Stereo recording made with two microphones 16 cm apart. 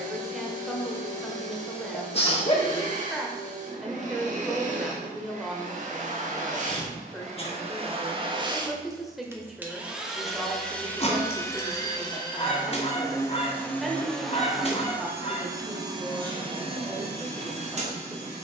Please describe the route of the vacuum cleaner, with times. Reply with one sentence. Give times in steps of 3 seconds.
In this clip you hear the vacuum cleaner on the right from 0 s, in the centre from 9 s and on the right from 15 s.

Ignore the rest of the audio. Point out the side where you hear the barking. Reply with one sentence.
You can hear the barking on the left.